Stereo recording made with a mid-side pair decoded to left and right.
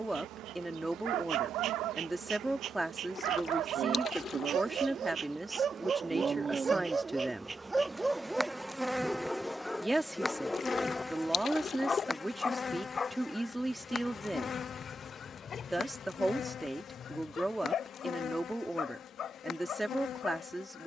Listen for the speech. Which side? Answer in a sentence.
In this clip you hear the speech in the centre.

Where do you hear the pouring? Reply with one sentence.
You can hear the pouring on the left.